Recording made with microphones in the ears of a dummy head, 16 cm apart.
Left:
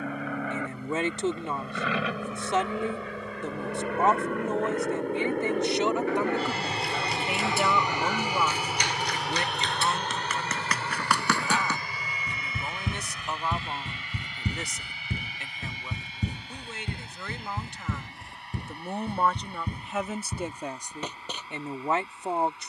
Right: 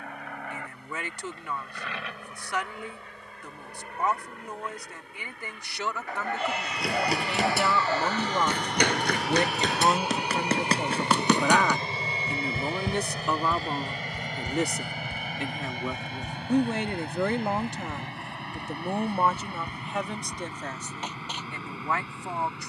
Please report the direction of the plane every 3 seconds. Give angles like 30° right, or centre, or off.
70° left, 50° left, 20° left, 10° right, 30° right, 40° right, 50° right, 50° right.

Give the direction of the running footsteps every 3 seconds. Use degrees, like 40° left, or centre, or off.
off, off, 50° right, 30° right, 10° left, 50° left, 70° left, 70° left.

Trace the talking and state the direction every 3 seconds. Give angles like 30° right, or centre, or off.
20° left, 20° left, centre, 40° right, 70° right, 50° right, centre, 20° left.